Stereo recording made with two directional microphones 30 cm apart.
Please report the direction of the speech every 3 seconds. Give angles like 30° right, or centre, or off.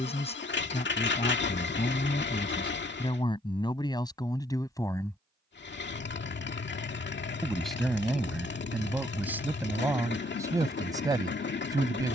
20° left, 10° left, centre, 10° right.